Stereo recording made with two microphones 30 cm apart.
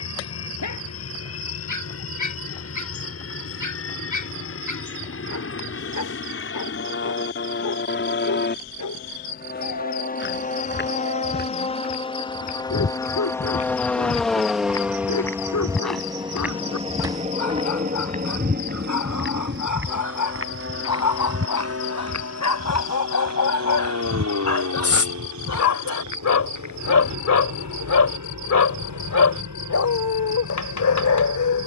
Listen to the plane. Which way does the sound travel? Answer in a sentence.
You can hear the plane travel towards the right.